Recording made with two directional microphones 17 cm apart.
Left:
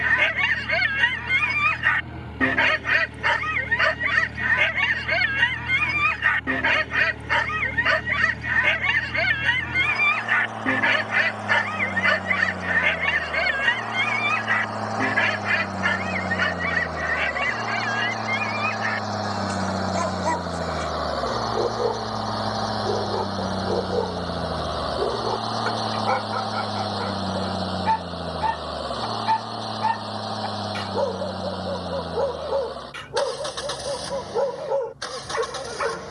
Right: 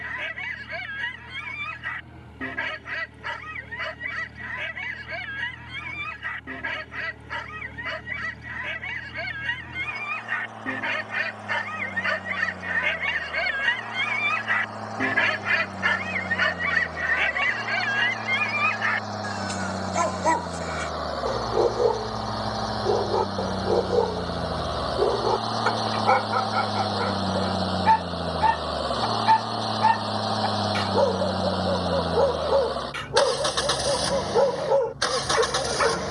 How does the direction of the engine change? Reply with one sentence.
You can hear the engine move from left to right.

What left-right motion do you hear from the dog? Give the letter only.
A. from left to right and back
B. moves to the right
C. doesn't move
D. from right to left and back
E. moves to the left
B.